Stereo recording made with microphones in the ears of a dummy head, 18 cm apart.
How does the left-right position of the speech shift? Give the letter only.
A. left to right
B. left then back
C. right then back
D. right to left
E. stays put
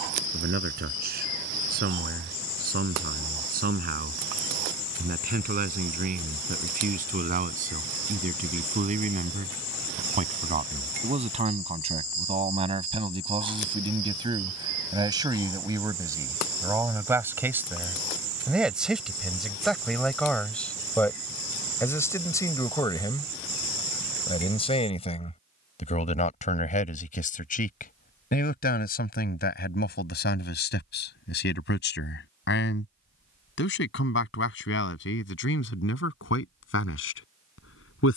D.